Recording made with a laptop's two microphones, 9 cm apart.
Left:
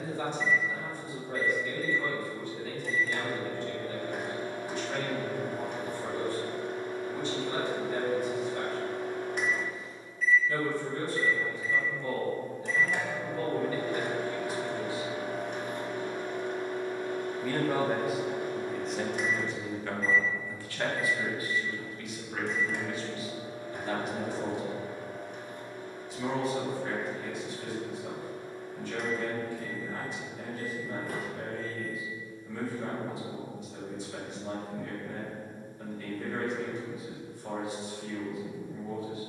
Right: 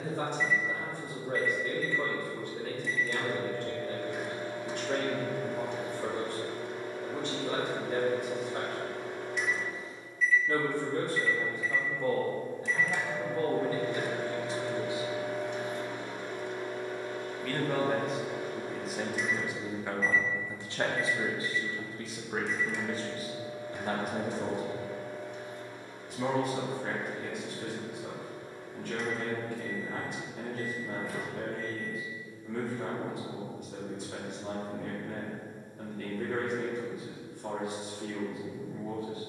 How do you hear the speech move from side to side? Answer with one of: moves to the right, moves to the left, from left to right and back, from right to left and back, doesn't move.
from right to left and back.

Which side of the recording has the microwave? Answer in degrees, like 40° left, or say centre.
50° left.